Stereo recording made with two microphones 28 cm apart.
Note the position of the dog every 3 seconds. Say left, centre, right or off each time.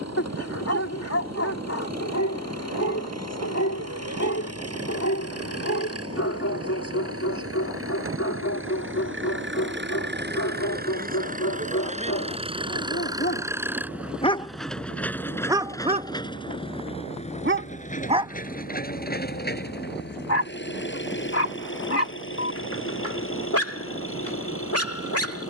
left, left, left, left, left, right, left, left, left.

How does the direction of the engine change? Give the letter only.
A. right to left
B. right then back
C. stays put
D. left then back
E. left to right
A.